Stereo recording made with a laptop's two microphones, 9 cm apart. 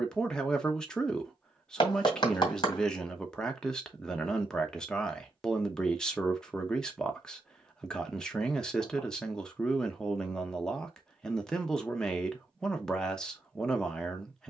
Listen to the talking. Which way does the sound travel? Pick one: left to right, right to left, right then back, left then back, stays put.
stays put.